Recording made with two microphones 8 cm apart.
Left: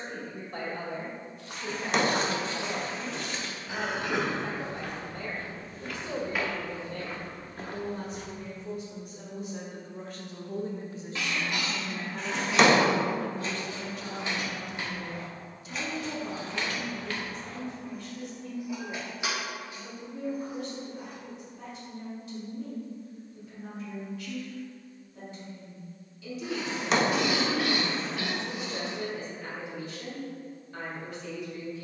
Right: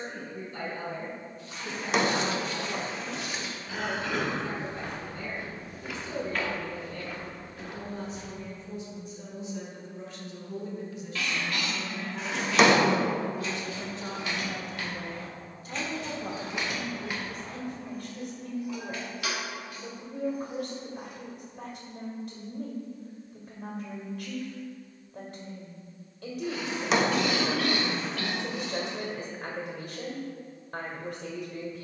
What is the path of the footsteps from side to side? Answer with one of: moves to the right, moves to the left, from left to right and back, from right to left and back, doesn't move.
from left to right and back.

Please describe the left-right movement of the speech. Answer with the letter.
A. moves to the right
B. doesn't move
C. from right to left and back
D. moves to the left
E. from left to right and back
A.